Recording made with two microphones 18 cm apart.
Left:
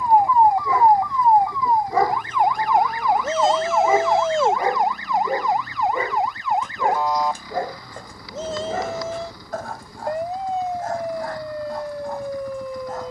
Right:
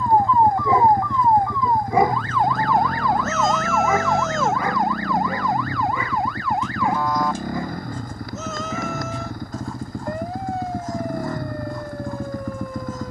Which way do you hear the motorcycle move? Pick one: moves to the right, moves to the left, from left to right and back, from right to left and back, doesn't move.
doesn't move.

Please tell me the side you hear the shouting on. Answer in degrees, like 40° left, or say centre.
30° left.